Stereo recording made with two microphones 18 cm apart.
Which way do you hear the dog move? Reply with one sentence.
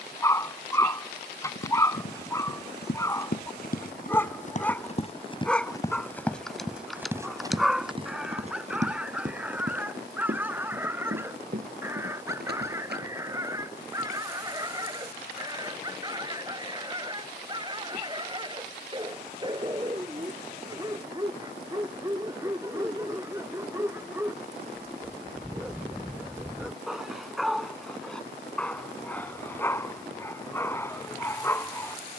In this clip you hear the dog move from left to right and back again.